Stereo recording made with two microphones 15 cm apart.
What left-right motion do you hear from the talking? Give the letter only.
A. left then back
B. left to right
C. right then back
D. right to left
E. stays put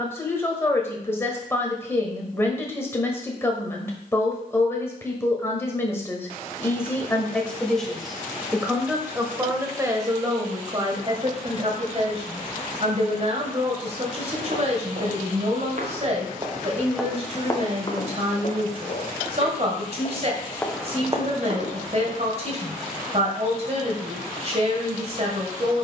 B.